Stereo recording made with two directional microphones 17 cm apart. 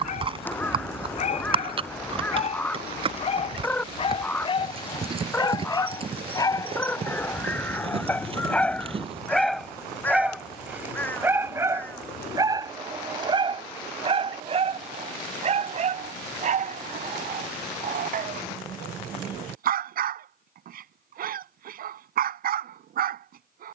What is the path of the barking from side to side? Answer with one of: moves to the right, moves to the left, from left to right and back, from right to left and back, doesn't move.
moves to the right.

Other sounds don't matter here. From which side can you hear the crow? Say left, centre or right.
centre.